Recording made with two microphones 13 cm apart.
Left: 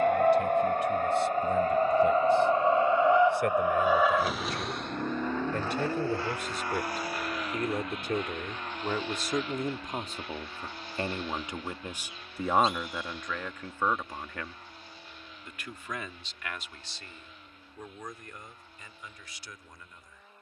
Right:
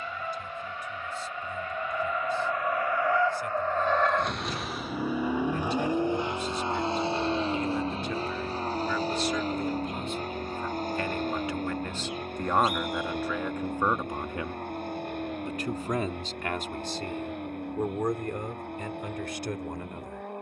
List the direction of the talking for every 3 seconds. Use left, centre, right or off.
left, left, left, left, centre, right, right.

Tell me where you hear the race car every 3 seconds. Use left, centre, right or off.
left, centre, right, right, right, right, right.